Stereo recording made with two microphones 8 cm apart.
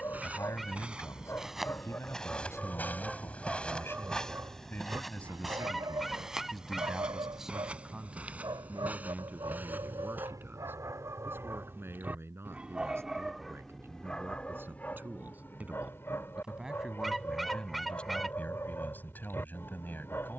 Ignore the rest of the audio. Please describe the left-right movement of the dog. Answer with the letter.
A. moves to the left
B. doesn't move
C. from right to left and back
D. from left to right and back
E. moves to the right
D.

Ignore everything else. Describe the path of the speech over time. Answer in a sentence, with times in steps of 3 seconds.
In this clip you hear the speech on the left from 0 s, in the centre from 6 s, on the right from 9 s, in the centre from 15 s and on the left from 18 s.